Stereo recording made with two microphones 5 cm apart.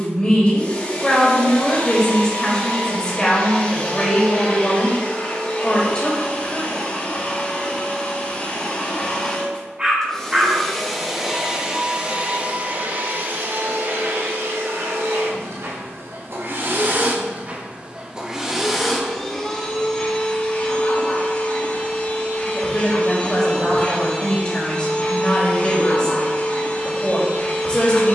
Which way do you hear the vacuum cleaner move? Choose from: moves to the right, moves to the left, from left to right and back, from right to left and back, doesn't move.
from left to right and back.